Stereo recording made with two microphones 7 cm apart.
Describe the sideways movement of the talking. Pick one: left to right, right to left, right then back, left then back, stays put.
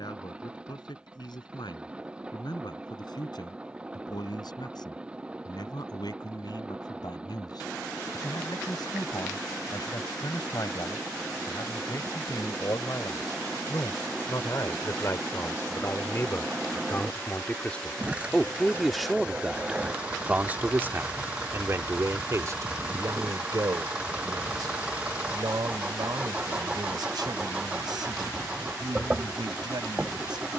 left to right.